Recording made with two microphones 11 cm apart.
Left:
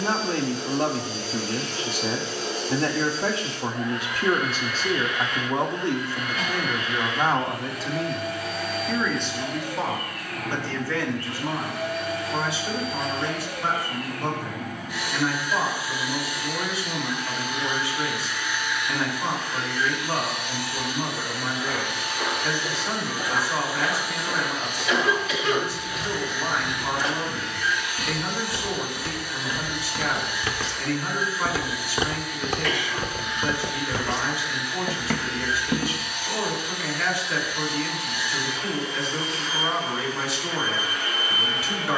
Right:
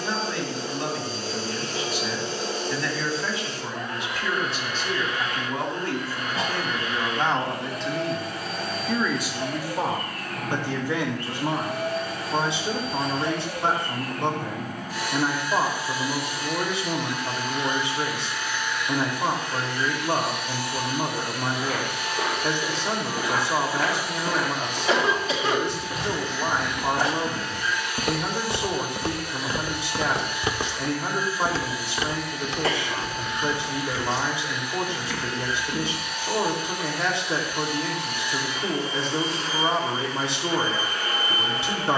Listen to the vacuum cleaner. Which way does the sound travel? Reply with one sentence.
You can hear the vacuum cleaner stay in one place.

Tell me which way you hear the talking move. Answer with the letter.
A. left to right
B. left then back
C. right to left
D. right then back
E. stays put
A.